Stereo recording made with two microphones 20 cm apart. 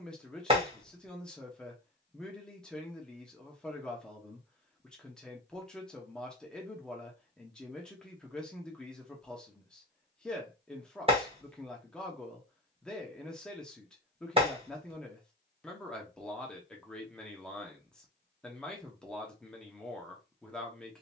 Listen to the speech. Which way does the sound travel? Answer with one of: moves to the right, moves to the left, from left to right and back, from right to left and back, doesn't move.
doesn't move.